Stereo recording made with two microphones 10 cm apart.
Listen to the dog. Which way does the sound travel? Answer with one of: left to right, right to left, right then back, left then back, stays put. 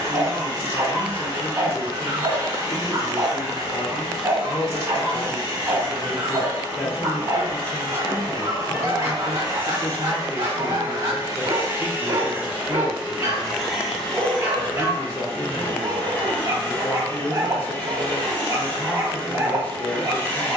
stays put.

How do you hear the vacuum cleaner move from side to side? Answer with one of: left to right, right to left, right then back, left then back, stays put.
right to left.